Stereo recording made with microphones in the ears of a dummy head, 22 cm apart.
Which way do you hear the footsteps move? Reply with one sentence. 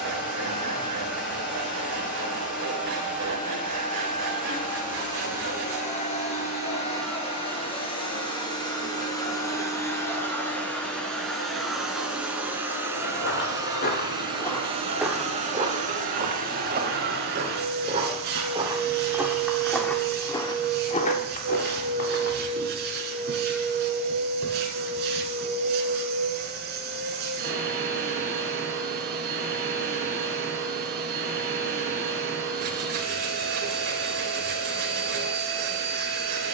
You can hear the footsteps go right and come back.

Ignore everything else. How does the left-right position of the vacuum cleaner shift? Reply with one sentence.
In this clip you hear the vacuum cleaner move to the right.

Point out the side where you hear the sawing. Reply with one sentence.
In this clip you hear the sawing on the right.